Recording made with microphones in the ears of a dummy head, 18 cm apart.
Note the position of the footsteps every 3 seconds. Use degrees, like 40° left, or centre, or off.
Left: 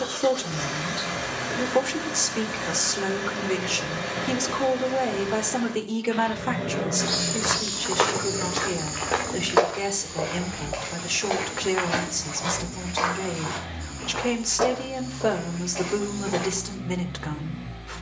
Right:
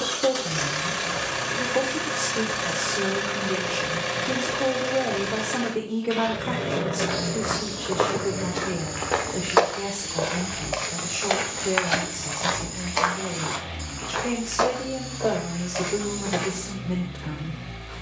off, off, 50° left, 30° right, 60° right, 70° right.